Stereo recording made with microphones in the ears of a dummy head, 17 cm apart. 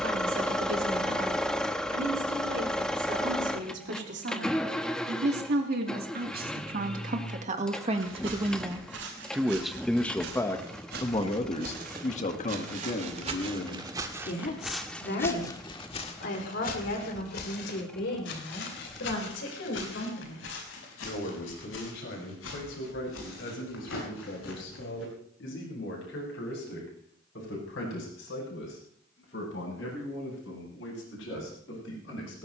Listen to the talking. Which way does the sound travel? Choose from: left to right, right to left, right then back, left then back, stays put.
right to left.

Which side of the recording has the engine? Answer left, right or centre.
centre.